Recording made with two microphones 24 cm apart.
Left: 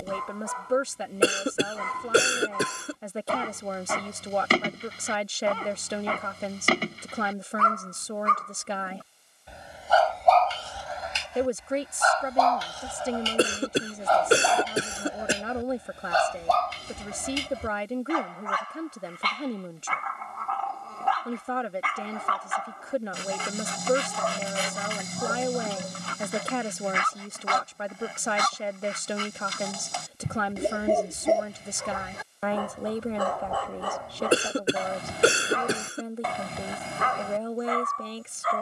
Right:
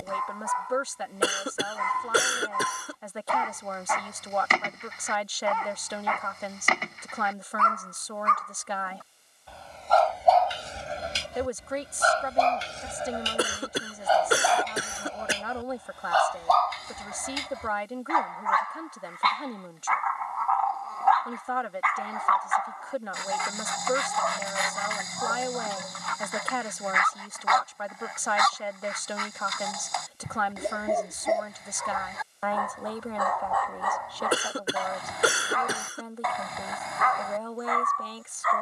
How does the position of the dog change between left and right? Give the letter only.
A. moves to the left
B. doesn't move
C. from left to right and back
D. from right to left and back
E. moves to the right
C.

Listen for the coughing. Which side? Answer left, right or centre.
left.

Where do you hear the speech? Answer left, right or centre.
left.